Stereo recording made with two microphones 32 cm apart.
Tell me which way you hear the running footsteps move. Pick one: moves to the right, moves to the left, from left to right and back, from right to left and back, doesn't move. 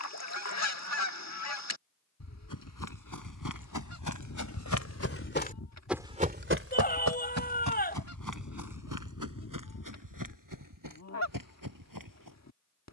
moves to the right.